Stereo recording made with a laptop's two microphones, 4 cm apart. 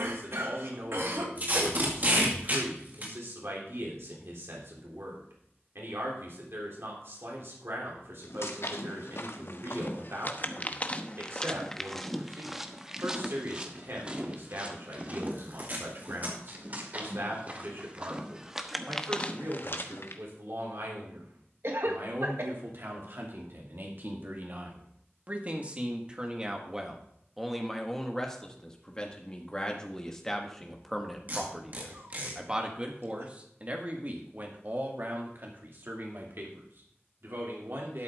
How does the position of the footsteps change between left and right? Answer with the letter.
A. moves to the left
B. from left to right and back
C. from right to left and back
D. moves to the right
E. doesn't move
B.